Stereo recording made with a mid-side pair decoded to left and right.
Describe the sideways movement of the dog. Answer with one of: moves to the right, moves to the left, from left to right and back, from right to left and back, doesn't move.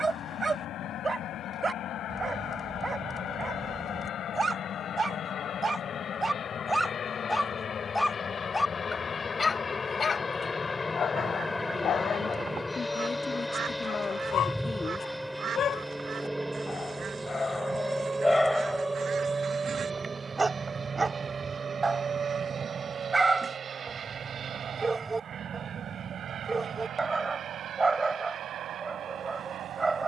from right to left and back.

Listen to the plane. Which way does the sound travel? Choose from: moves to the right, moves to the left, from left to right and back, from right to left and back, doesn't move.
moves to the right.